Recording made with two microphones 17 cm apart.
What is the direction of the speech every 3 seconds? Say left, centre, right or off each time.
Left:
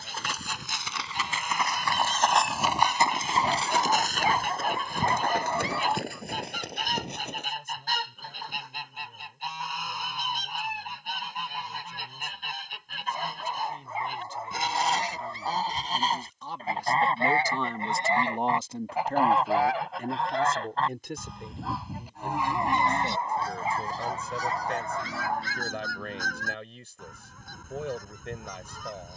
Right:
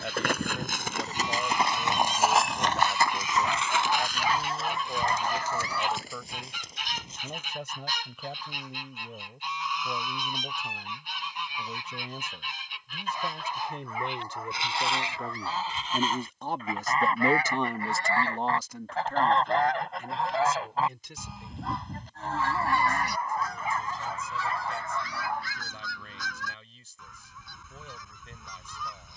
right, right, right, right, right, right, left, left, left, left.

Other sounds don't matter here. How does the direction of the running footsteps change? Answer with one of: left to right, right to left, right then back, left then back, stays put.
right to left.